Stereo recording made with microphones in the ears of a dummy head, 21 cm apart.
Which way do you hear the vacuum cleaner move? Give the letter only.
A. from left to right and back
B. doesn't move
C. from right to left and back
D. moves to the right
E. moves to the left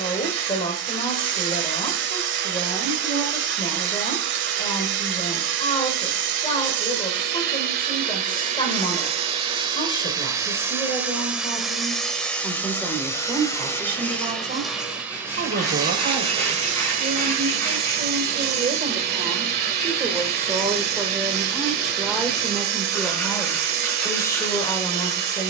C.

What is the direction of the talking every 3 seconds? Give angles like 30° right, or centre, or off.
20° left, 20° left, 20° left, 20° left, 10° right, 40° right, 20° right, centre, 20° left.